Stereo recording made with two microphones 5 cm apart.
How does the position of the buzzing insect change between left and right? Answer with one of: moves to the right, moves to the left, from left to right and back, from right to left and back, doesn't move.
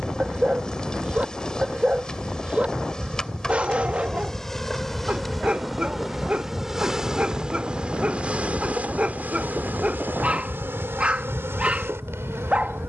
moves to the right.